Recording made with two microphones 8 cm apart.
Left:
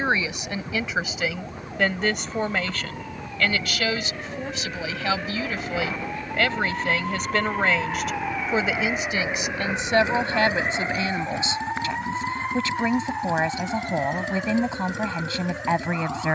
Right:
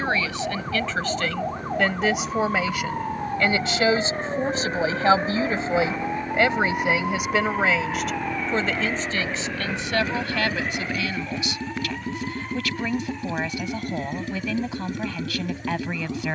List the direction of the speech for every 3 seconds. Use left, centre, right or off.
centre, right, centre, left, left, left.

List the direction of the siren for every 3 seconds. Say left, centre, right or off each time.
right, right, centre, left, left, left.